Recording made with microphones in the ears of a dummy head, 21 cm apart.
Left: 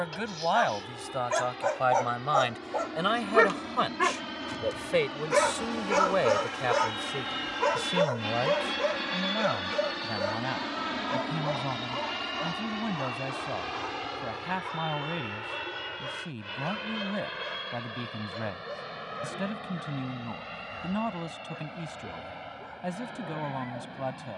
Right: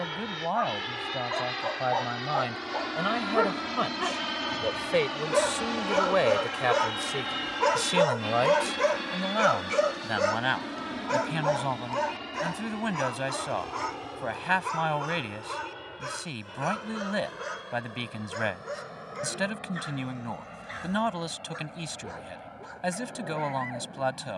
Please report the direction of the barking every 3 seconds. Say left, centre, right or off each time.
left, left, centre, right, right, right, right, right.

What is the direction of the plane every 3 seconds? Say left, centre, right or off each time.
right, right, centre, left, left, left, left, left.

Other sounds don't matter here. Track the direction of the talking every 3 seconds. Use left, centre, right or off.
left, centre, right, right, right, right, right, right.